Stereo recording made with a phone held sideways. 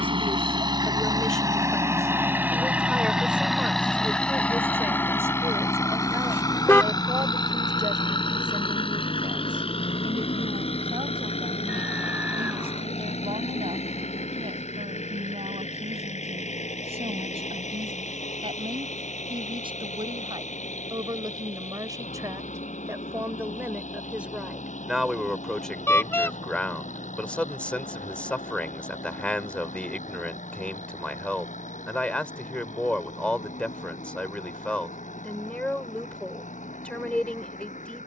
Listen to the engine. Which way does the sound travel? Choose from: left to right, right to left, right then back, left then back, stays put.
right to left.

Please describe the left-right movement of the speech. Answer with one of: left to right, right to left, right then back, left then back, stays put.
right then back.